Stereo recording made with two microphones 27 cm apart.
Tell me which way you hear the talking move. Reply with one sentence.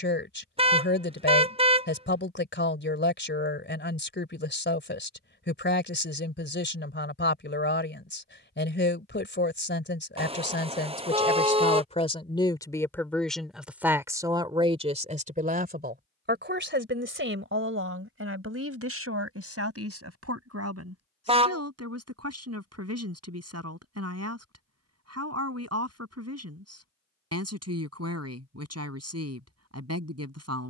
In this clip you hear the talking move from left to right.